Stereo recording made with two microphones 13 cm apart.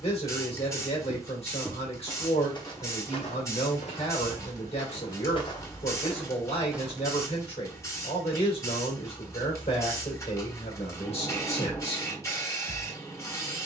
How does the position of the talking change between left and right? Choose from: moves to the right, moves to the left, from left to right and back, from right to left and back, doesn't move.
doesn't move.